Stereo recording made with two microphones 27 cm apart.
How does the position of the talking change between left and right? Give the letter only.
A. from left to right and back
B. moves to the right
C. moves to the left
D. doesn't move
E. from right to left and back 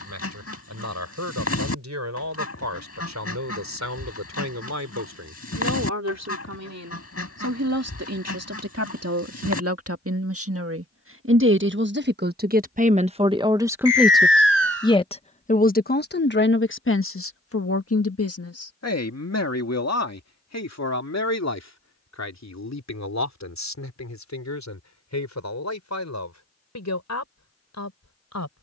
C.